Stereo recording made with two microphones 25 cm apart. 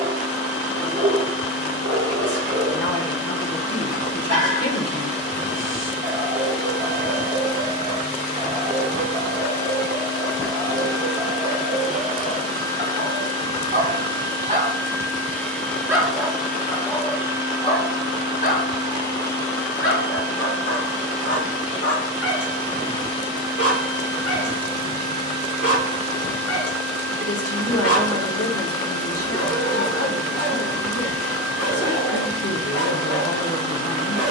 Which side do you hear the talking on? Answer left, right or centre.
left.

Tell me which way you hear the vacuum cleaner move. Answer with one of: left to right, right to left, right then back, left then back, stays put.
left then back.